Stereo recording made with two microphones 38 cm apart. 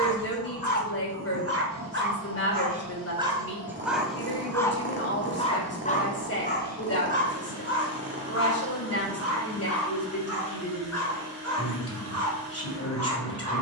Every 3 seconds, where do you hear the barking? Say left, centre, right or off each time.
right, centre, left, left, left.